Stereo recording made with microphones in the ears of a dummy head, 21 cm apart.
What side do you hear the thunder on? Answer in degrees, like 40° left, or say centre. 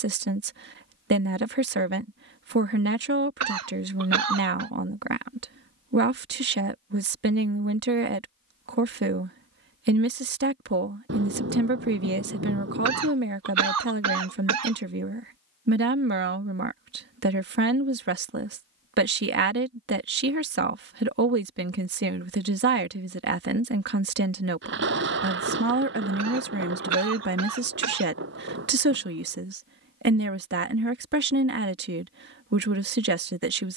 50° right.